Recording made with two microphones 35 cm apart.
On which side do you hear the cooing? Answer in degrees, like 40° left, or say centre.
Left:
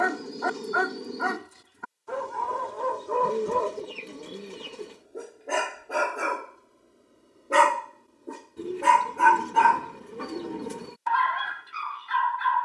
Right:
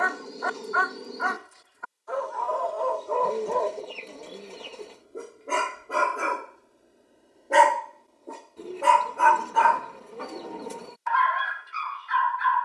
20° left.